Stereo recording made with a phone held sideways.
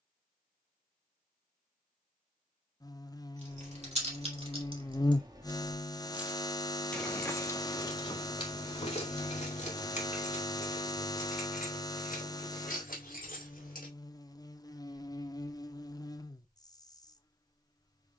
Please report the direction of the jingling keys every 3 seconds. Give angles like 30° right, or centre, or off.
off, 40° right, 30° left, 50° left, 70° left, off.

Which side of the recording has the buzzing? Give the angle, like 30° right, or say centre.
20° left.